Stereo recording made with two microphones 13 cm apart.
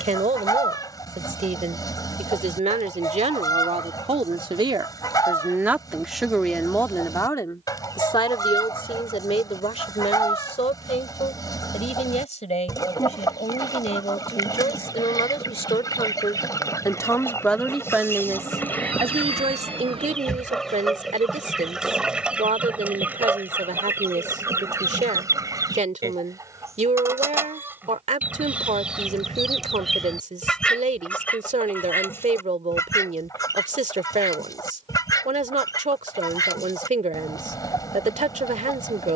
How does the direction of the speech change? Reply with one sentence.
In this clip you hear the speech move from right to left and back again.